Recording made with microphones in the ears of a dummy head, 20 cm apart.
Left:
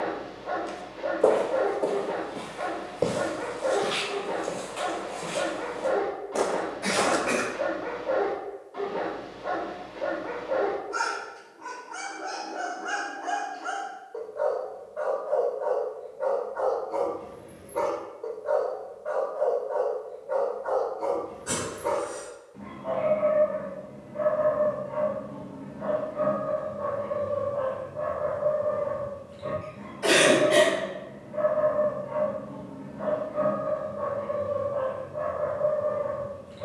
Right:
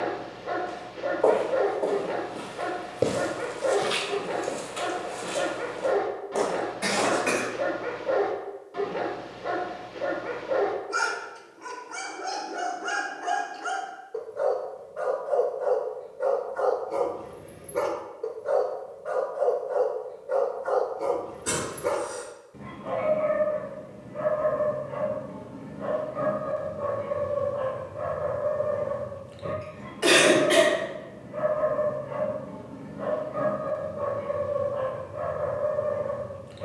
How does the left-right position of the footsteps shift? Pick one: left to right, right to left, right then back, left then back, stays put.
right then back.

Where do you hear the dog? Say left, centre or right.
right.